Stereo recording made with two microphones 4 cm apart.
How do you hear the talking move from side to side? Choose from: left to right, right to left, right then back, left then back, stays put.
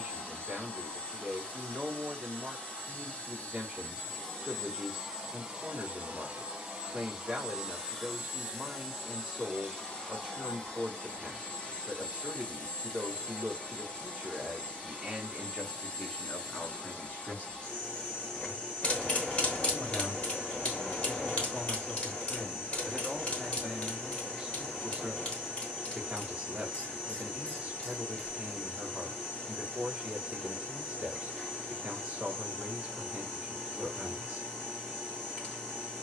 left then back.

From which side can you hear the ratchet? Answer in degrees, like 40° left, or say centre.
30° left.